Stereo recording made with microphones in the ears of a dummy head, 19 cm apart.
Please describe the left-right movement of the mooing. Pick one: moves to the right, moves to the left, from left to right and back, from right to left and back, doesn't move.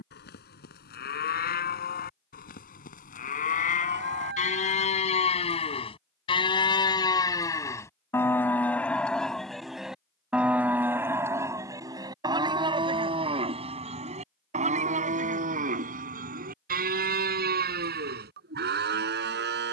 moves to the right.